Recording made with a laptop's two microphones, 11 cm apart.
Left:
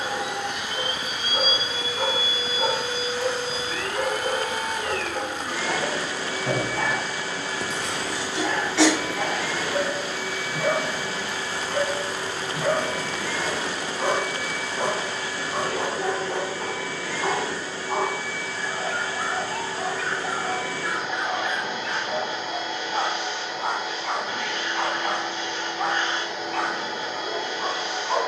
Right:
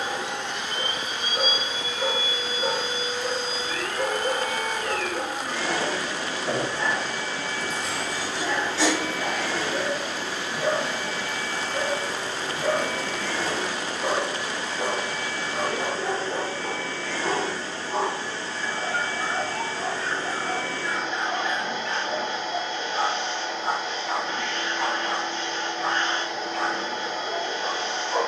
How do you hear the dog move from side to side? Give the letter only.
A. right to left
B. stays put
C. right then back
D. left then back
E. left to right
B.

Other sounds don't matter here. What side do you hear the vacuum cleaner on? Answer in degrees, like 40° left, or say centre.
10° left.